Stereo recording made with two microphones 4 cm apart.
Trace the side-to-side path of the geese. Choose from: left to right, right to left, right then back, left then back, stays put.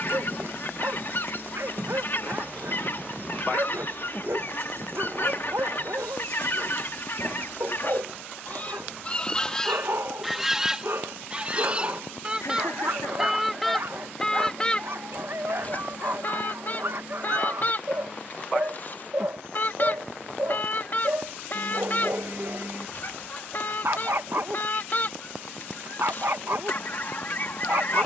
right then back.